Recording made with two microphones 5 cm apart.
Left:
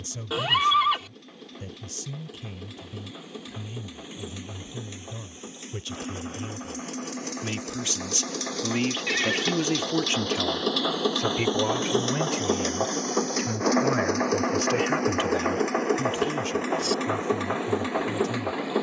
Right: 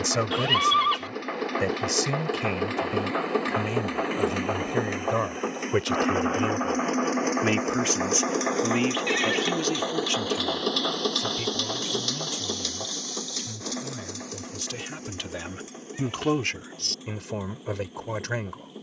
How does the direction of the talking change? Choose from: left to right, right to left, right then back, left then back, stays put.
left then back.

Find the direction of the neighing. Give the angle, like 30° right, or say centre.
centre.